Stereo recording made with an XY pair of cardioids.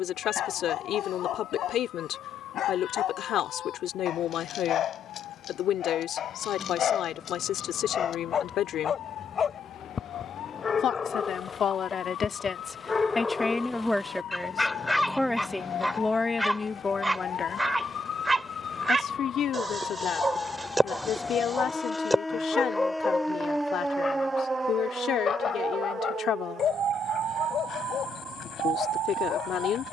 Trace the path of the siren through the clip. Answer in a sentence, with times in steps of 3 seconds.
In this clip you hear the siren on the left from 0 s, in the centre from 21 s and on the right from 24 s.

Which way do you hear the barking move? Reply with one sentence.
In this clip you hear the barking go right and come back.